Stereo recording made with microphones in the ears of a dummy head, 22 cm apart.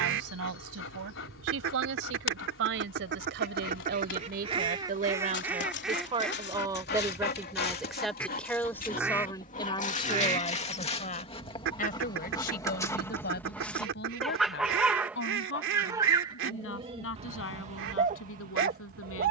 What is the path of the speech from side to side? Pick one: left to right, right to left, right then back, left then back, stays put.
right to left.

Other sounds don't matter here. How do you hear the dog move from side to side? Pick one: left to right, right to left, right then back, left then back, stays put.
left to right.